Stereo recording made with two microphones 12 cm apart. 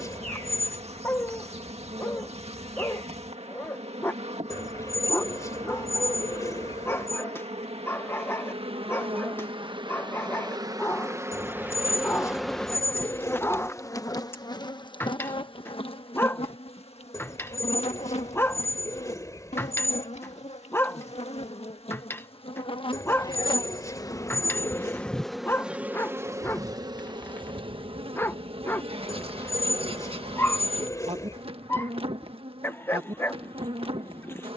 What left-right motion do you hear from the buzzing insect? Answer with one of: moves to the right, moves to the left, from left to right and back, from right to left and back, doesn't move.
from right to left and back.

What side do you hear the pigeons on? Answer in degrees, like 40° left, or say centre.
30° left.